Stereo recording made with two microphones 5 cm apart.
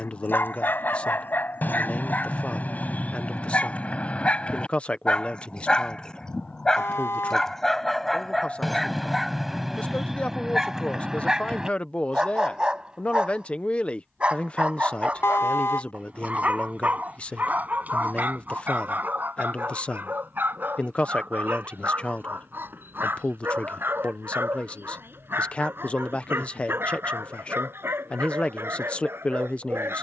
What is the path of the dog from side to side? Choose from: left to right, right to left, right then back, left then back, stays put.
left to right.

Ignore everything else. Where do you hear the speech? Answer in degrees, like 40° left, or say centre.
20° left.